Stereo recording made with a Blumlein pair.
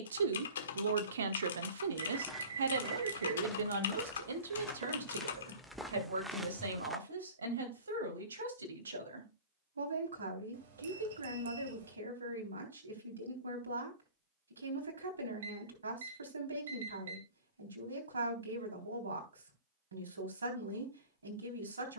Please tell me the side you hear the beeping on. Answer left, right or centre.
right.